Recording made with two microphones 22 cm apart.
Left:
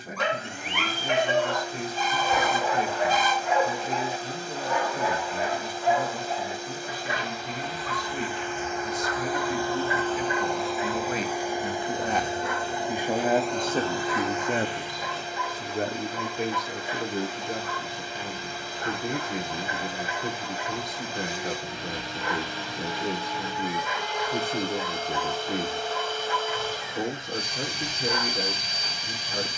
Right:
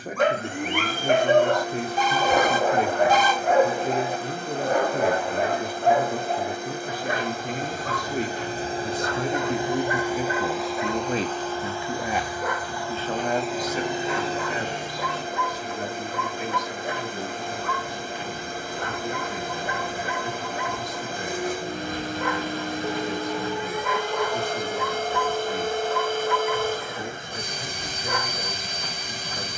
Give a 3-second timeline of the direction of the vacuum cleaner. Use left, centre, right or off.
right, right, right, centre, centre, right, right, right, right, right.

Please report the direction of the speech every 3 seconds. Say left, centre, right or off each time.
right, right, right, right, left, left, left, left, left, left.